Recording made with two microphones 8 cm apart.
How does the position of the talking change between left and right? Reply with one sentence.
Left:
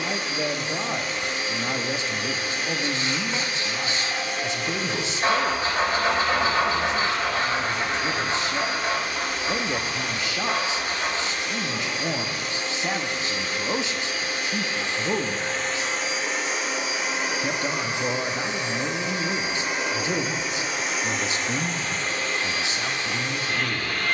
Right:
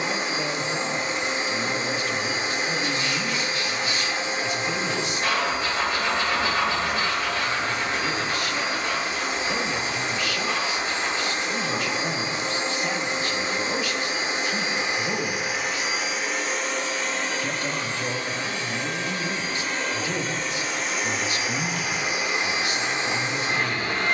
You can hear the talking stay put.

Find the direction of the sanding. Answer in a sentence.
In this clip you hear the sanding on the left.